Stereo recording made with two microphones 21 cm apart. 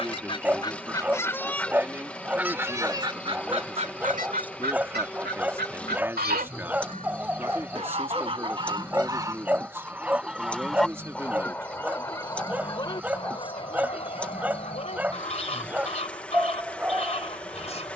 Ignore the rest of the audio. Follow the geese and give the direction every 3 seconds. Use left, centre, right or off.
centre, right, right, centre, left, left.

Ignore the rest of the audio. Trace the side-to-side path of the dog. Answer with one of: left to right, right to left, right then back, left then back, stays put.
stays put.